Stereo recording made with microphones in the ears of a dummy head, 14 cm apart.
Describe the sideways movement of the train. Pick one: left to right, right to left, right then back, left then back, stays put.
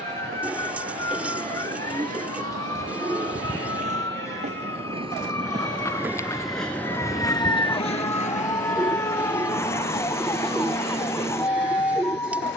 right to left.